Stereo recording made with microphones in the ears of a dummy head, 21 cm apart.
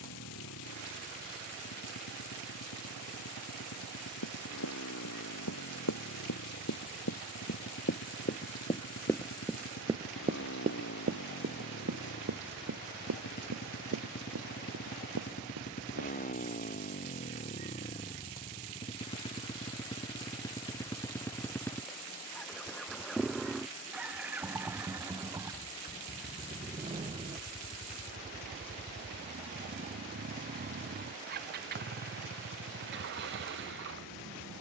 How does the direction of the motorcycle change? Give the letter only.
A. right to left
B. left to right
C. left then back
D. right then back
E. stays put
B.